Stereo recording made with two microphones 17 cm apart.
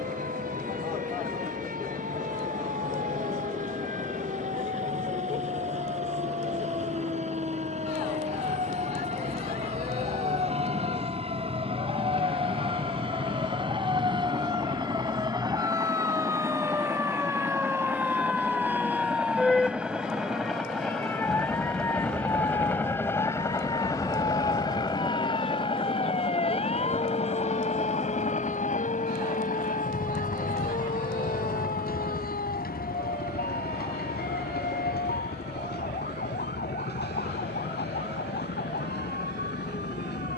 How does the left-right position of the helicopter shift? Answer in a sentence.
You can hear the helicopter move from right to left.